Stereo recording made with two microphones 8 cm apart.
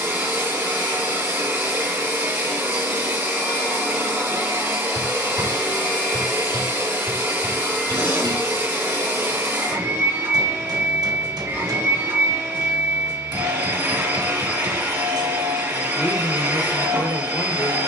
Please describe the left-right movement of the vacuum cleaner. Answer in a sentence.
You can hear the vacuum cleaner stay put.